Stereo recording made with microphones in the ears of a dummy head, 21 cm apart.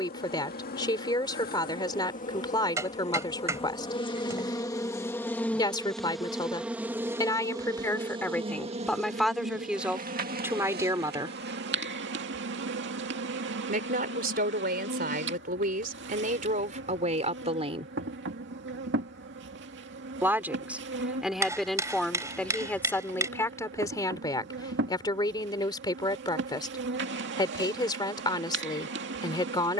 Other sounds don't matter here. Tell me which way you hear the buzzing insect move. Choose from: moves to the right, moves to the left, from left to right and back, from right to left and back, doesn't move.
moves to the right.